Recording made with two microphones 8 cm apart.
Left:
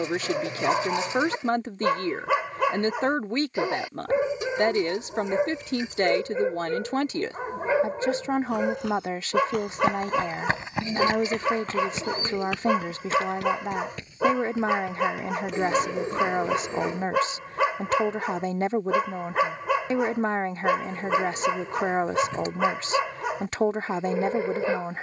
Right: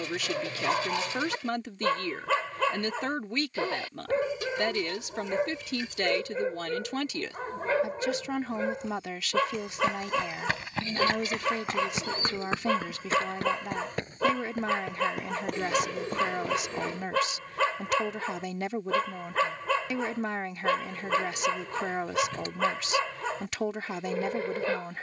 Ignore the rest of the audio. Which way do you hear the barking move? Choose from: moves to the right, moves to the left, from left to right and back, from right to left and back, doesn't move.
doesn't move.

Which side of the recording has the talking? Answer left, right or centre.
left.